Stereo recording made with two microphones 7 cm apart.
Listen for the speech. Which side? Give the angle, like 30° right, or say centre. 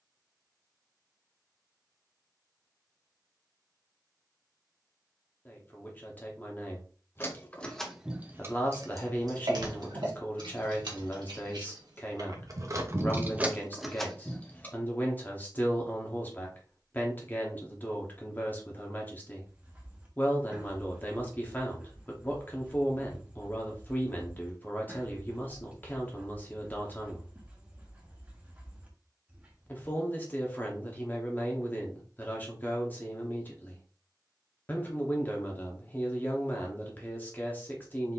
30° left.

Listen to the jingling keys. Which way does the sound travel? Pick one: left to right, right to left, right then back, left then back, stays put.
right then back.